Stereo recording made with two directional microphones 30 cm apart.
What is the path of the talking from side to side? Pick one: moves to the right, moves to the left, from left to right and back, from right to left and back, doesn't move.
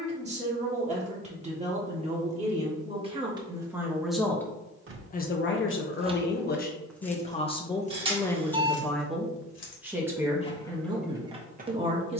from right to left and back.